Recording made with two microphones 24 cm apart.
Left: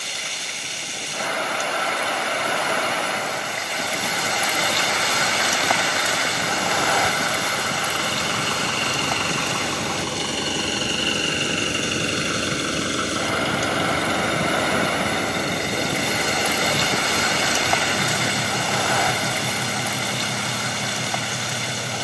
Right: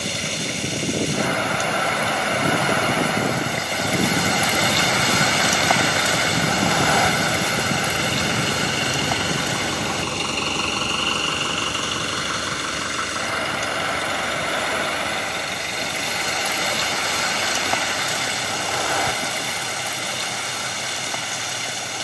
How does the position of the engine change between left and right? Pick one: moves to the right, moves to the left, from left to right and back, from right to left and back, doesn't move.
moves to the left.